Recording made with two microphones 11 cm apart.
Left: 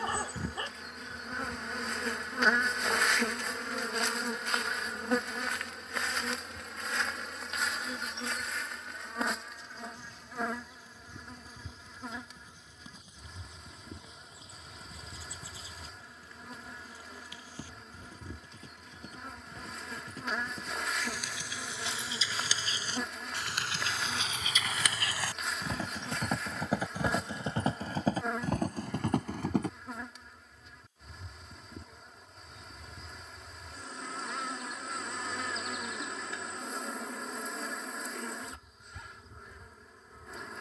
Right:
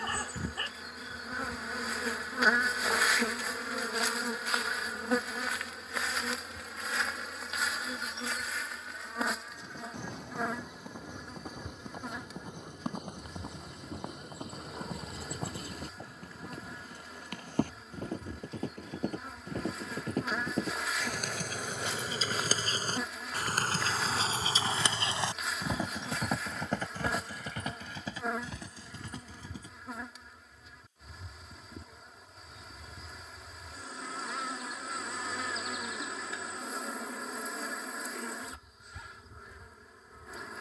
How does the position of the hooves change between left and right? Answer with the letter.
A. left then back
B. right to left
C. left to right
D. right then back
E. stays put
B.